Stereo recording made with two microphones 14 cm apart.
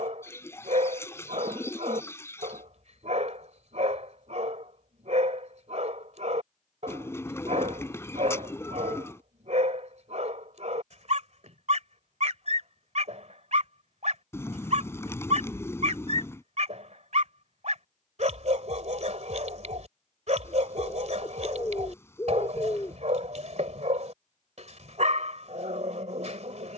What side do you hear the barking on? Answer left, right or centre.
right.